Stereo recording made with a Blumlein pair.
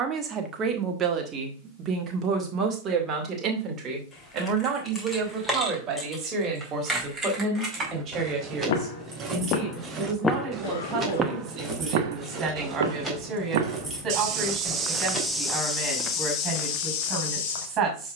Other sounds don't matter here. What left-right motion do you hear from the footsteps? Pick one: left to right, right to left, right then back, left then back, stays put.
right then back.